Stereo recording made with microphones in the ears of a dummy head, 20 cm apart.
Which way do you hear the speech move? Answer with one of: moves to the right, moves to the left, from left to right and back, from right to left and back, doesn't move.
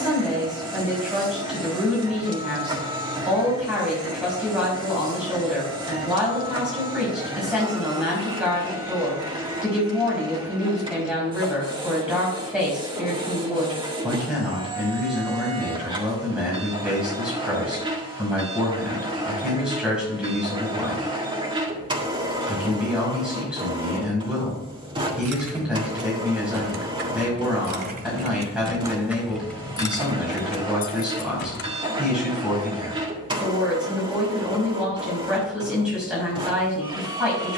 doesn't move.